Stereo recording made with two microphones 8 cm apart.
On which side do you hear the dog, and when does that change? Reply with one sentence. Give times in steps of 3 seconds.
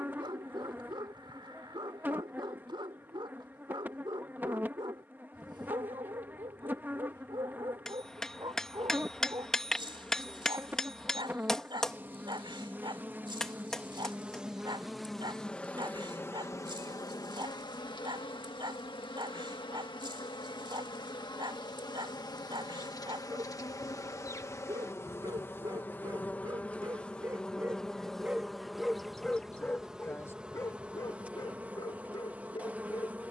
In this clip you hear the dog on the right from 0 s, in the centre from 27 s and on the left from 30 s.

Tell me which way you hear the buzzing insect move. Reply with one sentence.
You can hear the buzzing insect go left and come back.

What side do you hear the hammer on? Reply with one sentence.
In this clip you hear the hammer in the centre.